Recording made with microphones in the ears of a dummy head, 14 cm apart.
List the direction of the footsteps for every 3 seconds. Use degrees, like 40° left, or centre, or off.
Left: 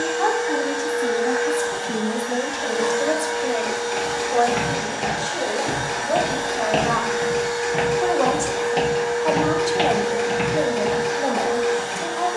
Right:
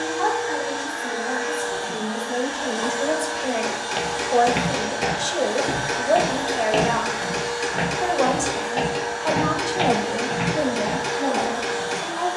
off, 20° right, 10° left, 30° left.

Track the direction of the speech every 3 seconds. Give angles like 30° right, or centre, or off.
40° left, 30° right, 20° right, 20° left.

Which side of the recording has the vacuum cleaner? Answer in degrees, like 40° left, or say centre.
20° left.